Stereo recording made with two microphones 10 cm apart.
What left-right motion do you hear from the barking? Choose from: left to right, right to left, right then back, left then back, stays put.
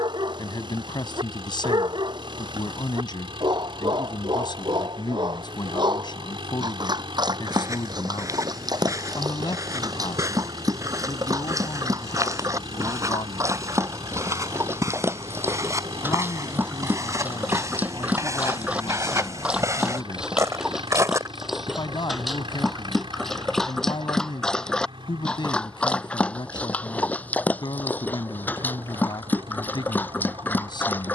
right to left.